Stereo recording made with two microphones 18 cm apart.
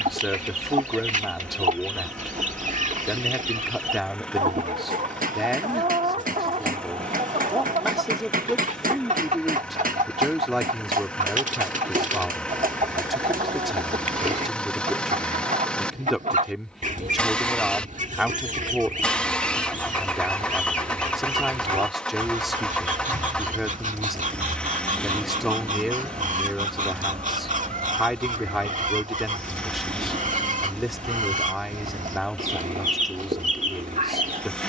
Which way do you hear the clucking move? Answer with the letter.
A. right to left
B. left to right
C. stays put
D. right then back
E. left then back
C.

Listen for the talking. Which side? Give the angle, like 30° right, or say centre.
centre.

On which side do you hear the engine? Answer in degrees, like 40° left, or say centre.
10° left.